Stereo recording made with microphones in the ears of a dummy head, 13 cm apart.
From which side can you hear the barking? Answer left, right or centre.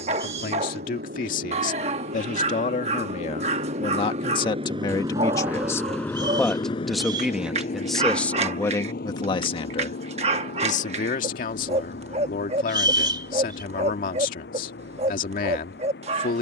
right.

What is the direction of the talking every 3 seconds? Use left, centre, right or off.
left, left, centre, left, left, left.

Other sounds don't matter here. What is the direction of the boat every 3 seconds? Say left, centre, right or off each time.
right, right, left, left, left, left.